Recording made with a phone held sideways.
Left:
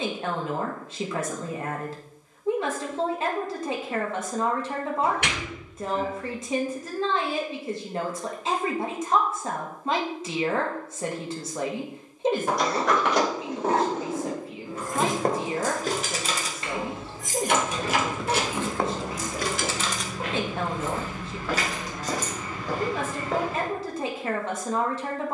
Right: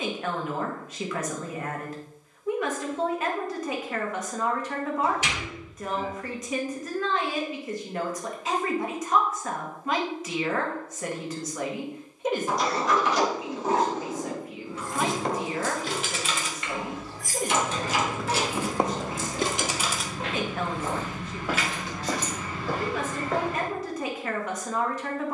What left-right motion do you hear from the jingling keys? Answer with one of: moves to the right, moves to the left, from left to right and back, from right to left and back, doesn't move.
from left to right and back.